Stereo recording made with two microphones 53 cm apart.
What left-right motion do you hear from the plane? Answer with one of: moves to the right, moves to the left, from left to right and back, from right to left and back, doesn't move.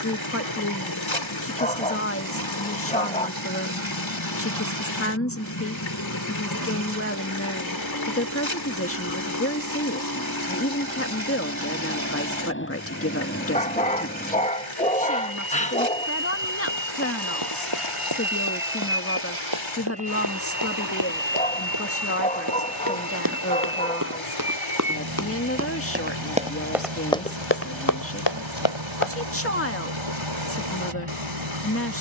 moves to the right.